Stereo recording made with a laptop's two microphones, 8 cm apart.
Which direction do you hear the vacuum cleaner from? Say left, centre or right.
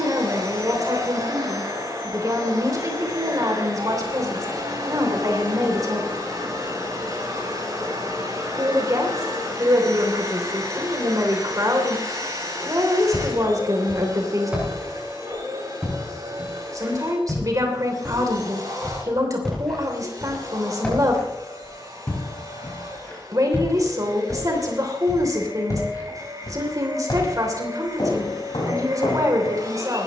right.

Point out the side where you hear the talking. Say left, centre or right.
right.